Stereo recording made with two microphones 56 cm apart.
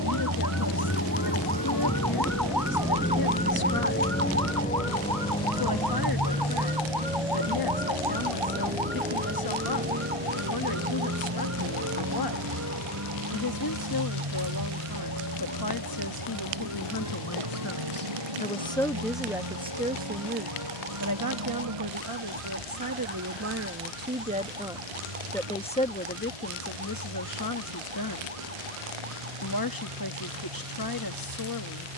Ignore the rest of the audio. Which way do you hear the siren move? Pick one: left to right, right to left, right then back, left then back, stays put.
left to right.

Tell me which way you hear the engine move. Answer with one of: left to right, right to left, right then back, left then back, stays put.
left to right.